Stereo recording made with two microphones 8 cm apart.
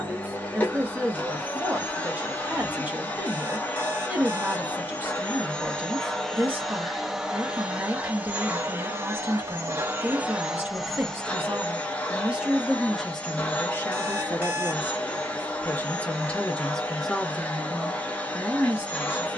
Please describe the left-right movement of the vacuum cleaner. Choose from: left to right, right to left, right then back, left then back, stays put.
right then back.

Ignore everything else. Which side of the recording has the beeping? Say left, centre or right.
right.